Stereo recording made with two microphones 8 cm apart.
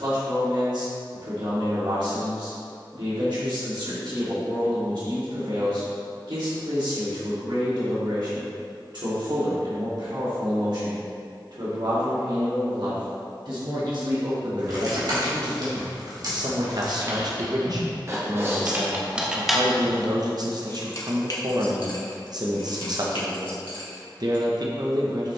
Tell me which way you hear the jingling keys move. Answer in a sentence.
In this clip you hear the jingling keys move from right to left.